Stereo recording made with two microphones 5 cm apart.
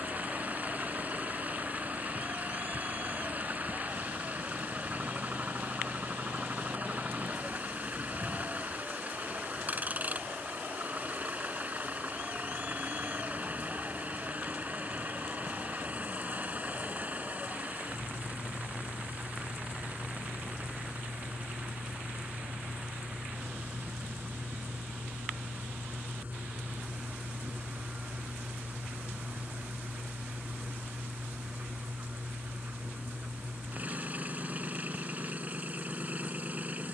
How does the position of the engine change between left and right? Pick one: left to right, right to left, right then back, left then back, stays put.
stays put.